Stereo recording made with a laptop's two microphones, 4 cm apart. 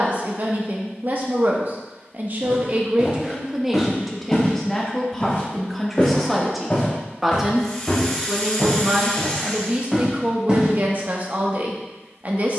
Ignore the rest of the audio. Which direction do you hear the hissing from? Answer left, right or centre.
centre.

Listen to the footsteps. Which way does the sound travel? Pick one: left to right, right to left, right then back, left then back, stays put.
left then back.